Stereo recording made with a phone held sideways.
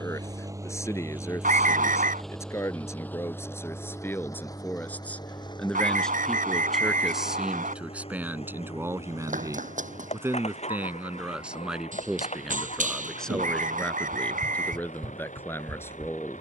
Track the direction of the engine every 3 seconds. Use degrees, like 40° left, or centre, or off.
10° right, 20° left, 30° left, 40° left, 50° left, 50° left.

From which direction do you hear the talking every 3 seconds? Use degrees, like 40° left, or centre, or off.
20° left, 10° left, 10° right, 10° right, 10° left, 10° left.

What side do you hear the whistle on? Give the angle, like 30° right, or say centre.
60° right.